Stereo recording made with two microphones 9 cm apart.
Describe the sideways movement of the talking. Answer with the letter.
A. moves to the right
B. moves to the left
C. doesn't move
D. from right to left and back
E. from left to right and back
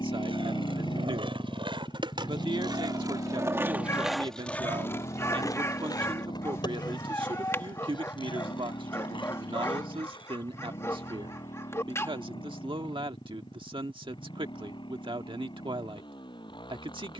C.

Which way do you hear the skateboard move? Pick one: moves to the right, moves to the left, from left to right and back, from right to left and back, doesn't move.
moves to the left.